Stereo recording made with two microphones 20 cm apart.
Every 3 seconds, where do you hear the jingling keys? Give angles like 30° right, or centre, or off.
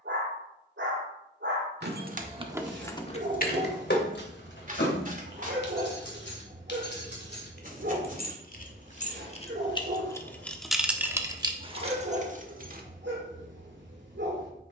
20° right, 50° left, 50° left, centre, 40° right.